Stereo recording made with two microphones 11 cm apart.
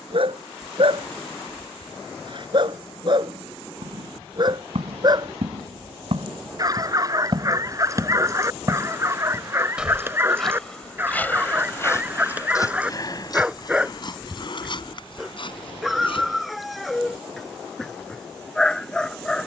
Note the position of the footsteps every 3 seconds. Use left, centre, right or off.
off, right, right, centre, left, left, off.